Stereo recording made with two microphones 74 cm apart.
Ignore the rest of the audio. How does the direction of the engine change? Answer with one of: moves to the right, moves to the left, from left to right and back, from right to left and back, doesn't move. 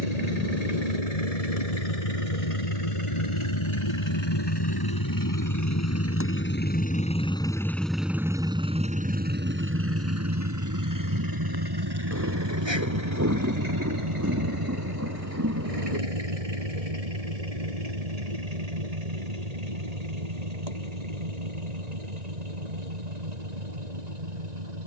moves to the right.